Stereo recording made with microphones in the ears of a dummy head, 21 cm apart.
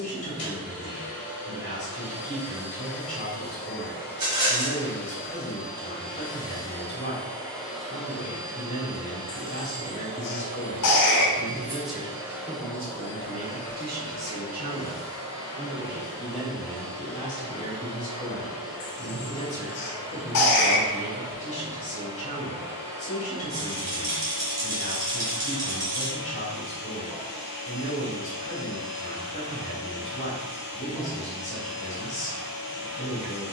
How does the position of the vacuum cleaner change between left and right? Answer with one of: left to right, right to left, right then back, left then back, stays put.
right then back.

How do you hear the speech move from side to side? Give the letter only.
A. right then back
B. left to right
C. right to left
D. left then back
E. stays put
A.